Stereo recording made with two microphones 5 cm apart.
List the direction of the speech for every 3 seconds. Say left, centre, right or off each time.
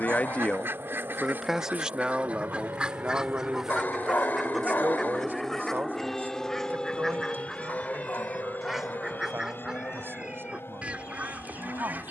centre, right, right, right.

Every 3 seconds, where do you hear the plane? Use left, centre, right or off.
right, right, left, left.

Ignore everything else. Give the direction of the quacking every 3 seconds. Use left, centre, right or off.
right, centre, centre, right.